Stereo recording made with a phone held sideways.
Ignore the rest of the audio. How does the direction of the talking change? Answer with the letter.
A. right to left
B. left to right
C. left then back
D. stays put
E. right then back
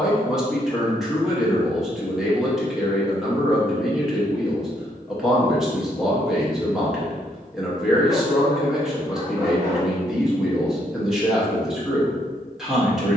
D.